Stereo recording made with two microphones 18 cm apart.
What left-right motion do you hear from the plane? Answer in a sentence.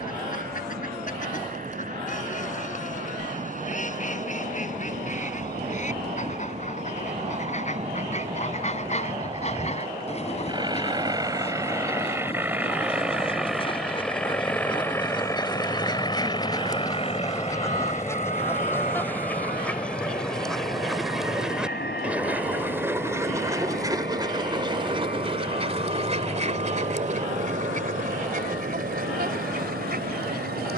You can hear the plane travel towards the left.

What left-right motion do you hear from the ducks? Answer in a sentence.
In this clip you hear the ducks move to the right.